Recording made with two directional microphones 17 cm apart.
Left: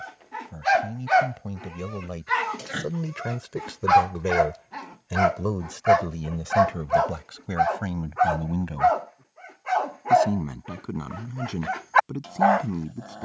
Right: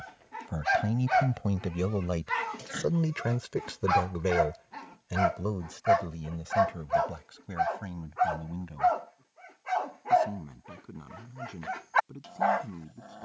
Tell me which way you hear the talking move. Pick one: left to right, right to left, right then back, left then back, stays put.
right to left.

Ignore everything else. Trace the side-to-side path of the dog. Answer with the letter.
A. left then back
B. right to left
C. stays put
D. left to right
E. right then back
C.